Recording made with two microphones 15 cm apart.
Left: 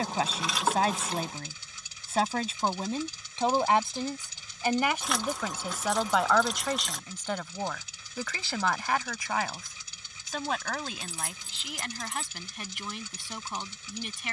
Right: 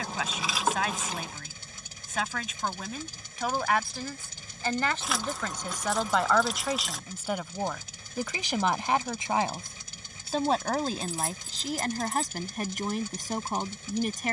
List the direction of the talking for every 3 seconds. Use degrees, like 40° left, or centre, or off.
30° left, 20° left, 10° right, 30° right, 40° right.